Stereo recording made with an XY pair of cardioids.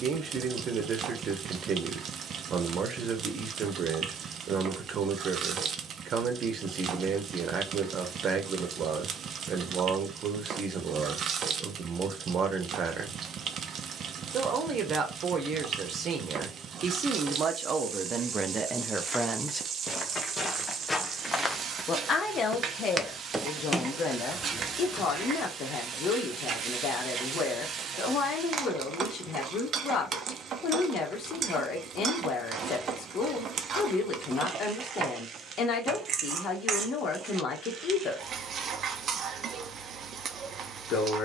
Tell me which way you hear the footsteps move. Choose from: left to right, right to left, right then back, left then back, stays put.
right then back.